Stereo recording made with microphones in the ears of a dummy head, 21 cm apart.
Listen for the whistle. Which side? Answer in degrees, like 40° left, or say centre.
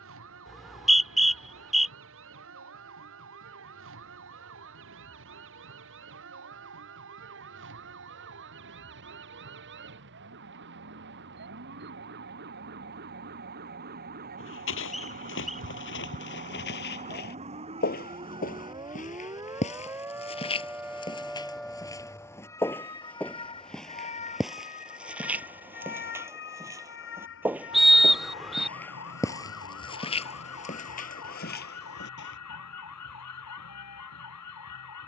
centre.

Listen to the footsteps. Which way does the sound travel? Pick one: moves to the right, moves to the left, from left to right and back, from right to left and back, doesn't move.
from left to right and back.